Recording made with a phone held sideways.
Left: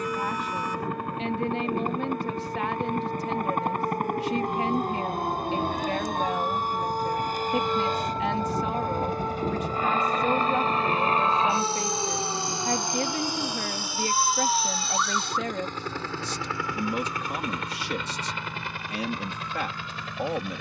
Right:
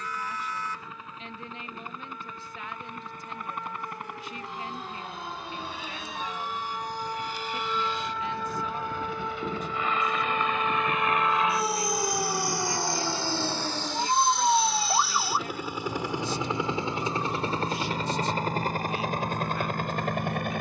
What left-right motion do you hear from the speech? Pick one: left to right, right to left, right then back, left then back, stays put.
stays put.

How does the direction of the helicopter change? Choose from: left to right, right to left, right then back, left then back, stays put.
left to right.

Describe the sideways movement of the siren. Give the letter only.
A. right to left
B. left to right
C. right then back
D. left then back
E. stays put
B.